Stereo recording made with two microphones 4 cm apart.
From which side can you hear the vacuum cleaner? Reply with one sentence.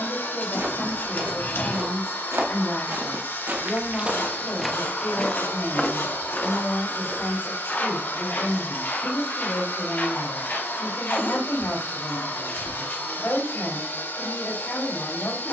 You can hear the vacuum cleaner on the left.